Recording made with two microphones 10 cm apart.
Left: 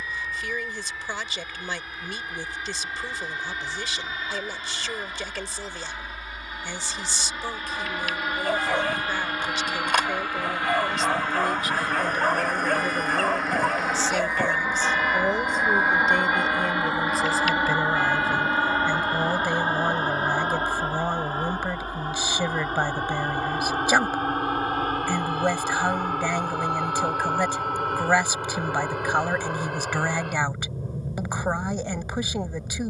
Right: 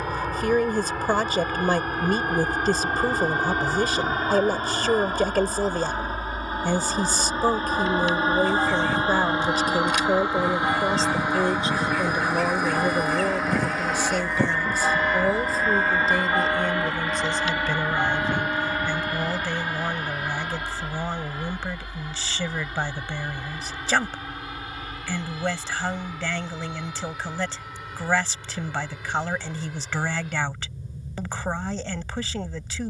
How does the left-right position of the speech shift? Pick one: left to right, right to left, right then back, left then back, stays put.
right to left.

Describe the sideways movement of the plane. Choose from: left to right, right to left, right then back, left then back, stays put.
right to left.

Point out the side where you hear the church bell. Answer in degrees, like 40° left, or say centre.
20° right.